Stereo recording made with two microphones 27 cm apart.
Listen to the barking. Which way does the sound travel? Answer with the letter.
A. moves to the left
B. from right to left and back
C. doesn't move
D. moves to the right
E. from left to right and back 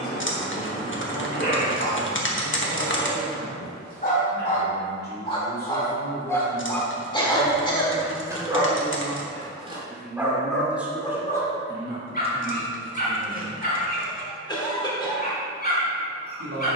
E.